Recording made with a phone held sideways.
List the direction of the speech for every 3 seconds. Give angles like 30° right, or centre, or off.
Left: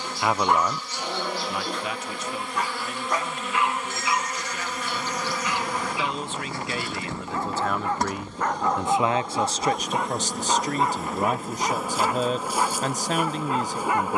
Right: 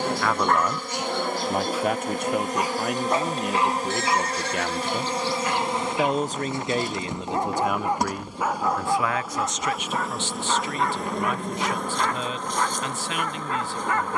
40° right, 60° right, 20° right, 40° left, 40° left.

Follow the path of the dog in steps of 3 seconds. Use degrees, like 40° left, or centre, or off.
10° right, 40° right, 20° right, 20° left, 20° left.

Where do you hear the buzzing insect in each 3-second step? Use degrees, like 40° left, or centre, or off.
50° right, 30° right, 20° right, centre, 10° left.